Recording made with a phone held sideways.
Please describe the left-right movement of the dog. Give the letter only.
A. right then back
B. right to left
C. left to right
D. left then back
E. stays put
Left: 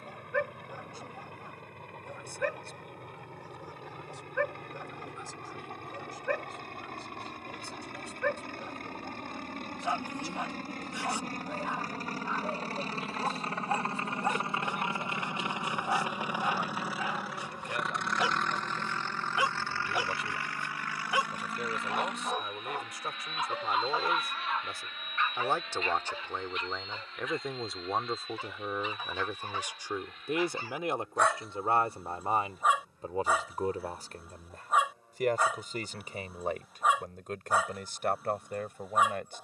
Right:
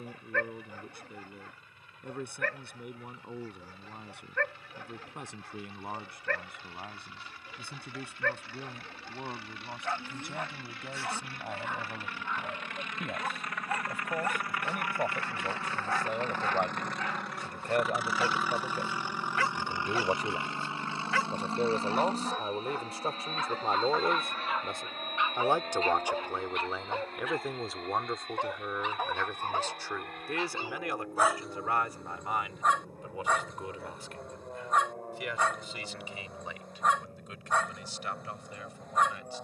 A.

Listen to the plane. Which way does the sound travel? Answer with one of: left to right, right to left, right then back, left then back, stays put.
left to right.